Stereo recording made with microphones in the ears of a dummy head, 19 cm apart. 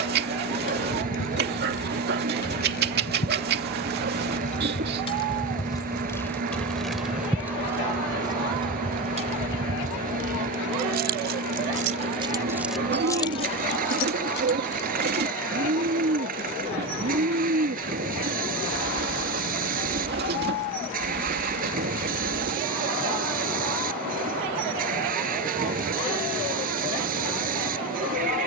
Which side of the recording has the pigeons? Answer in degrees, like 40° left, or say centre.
50° right.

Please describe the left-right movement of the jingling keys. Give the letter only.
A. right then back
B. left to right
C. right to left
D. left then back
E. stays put
A.